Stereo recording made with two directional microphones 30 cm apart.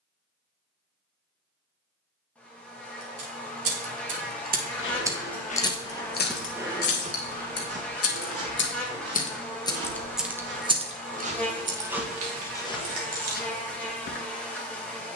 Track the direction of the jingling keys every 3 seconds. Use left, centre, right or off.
off, right, left, centre, right.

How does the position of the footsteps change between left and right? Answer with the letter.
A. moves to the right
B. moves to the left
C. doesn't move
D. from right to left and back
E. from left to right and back
E.